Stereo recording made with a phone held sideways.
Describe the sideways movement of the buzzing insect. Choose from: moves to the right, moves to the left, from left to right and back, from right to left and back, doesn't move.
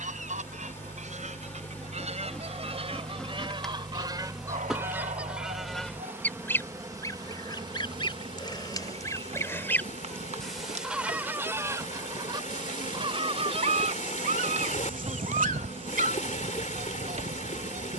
moves to the right.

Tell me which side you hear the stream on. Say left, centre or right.
left.